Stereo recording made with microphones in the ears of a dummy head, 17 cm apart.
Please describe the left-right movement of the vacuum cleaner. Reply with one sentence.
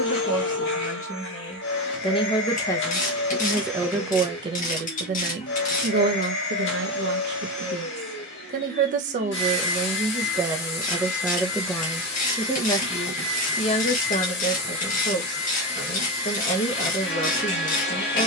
You can hear the vacuum cleaner stay put.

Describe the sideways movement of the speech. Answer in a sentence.
In this clip you hear the speech go right and come back.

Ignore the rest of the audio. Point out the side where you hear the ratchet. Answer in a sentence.
You can hear the ratchet on the left.